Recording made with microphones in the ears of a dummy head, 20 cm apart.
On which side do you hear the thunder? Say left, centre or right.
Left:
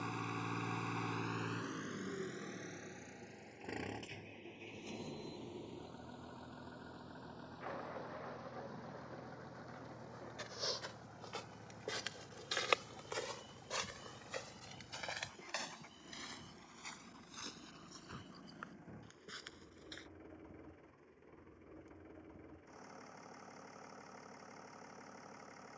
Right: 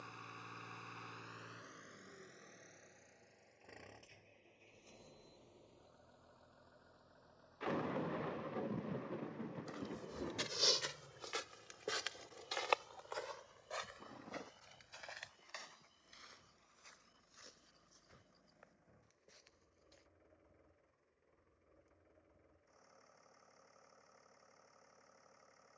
right.